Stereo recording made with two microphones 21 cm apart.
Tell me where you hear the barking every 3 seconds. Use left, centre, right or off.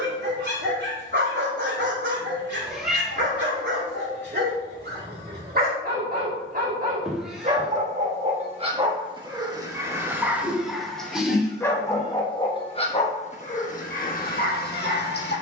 right, right, right, centre, left.